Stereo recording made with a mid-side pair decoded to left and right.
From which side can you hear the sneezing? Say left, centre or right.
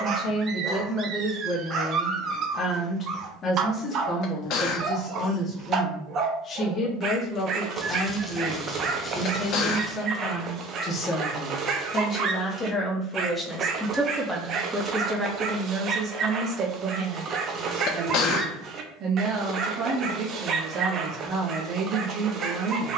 left.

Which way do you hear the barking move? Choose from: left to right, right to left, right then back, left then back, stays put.
stays put.